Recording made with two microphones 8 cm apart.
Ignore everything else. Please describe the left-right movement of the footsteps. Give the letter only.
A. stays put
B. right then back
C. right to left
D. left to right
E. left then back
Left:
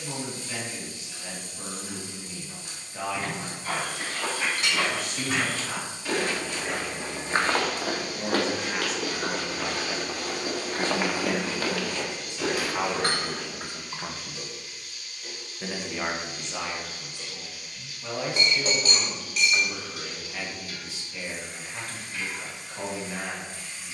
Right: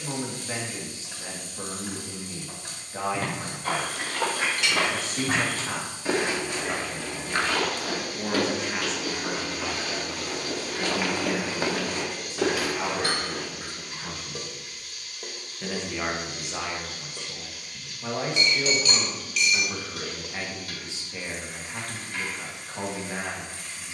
E.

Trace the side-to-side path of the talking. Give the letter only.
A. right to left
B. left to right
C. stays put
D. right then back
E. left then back
E.